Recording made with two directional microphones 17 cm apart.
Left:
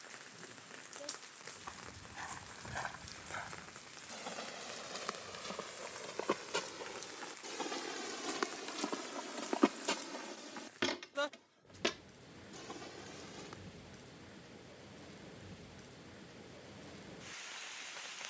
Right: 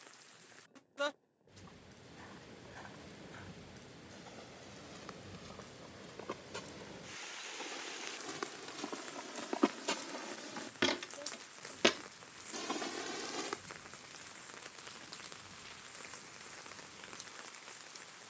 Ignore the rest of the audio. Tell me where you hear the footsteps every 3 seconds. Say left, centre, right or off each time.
left, left, left, centre, right, off.